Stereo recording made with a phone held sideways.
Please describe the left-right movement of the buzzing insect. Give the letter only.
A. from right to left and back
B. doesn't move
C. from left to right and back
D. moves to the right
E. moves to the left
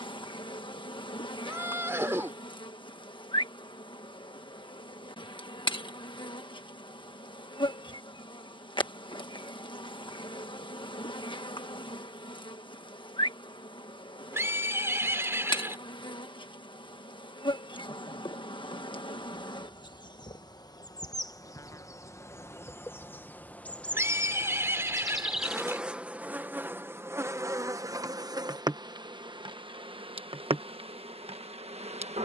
D.